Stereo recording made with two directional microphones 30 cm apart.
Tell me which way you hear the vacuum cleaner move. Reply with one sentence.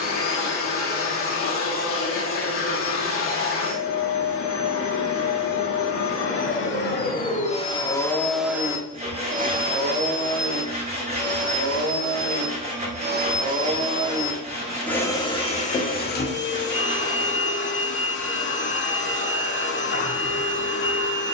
In this clip you hear the vacuum cleaner go right and come back.